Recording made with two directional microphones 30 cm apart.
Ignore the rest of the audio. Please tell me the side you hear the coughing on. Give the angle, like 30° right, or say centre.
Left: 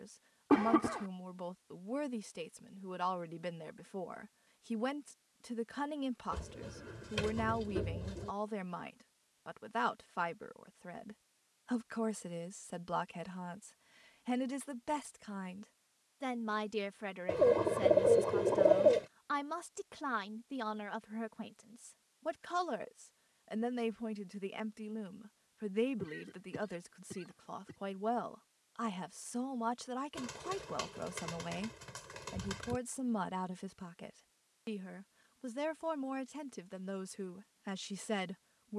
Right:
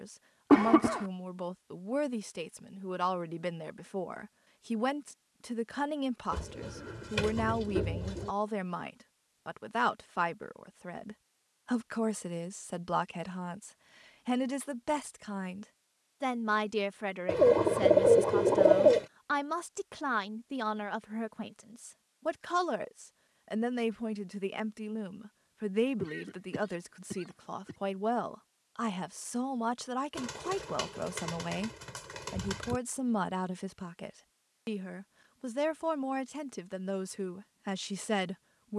40° right.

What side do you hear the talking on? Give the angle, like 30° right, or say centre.
30° right.